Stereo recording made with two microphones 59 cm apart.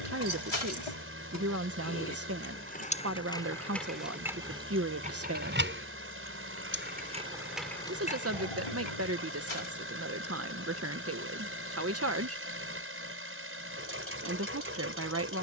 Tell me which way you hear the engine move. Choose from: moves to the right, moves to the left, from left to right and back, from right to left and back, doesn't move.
doesn't move.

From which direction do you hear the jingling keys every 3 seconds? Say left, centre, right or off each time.
left, centre, centre, off, off.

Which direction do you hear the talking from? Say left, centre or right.
right.